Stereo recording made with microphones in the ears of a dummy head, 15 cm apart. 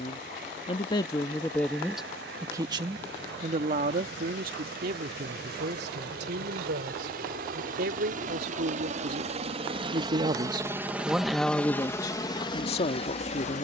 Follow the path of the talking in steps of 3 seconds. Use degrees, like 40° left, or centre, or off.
10° left, 60° right, 70° right, 20° right, 40° left.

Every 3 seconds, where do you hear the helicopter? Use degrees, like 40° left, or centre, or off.
80° right, 70° right, 60° right, 20° right, 30° left.